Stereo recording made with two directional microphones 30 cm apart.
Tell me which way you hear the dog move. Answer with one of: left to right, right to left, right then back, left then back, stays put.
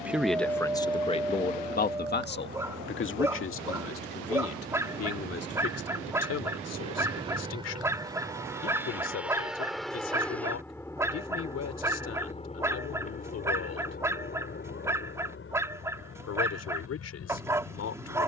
stays put.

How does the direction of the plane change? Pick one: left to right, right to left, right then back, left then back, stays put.
right to left.